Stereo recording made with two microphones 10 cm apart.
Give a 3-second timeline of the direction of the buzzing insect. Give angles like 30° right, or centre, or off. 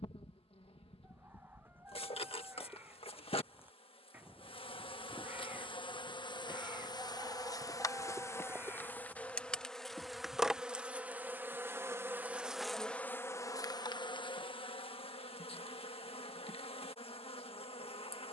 70° left, 60° left, 40° left, 10° right, 30° left, 70° left.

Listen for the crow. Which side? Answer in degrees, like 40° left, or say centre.
20° right.